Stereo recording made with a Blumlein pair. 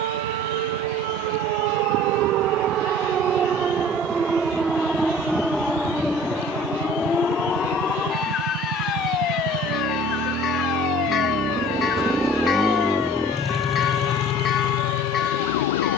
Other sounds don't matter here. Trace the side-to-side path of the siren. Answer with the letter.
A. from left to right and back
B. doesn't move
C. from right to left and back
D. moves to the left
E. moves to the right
D.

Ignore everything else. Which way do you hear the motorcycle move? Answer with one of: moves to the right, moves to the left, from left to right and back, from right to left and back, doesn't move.
moves to the left.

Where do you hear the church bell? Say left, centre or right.
left.